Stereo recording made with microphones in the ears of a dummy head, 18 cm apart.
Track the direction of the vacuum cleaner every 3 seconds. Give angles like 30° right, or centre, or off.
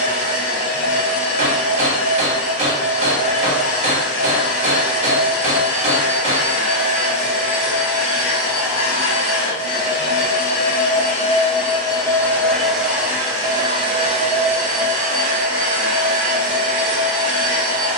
80° left, 80° left, 70° left, 40° left, 20° right, 50° right.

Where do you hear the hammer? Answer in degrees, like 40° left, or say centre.
30° right.